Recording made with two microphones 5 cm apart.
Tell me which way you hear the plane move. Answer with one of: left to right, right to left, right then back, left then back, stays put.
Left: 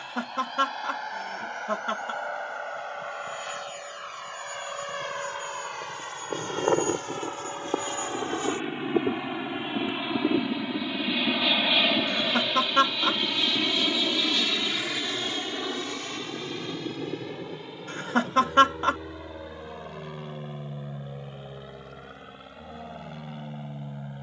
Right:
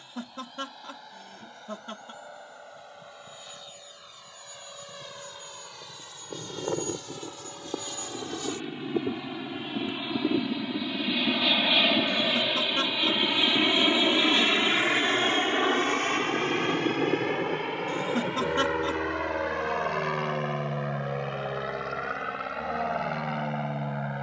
left to right.